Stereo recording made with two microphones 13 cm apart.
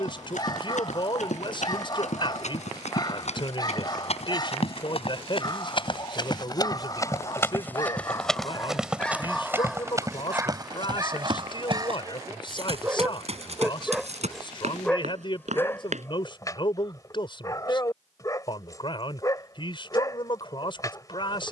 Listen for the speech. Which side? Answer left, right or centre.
left.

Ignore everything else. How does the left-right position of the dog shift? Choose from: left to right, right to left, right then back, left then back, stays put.
right then back.